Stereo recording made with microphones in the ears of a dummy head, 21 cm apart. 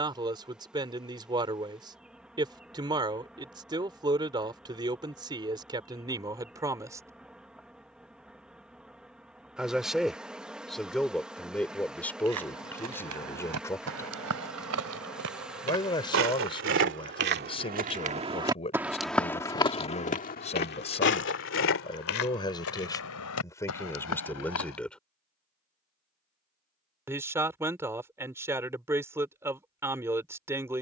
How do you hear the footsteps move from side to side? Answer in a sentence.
In this clip you hear the footsteps travel towards the left.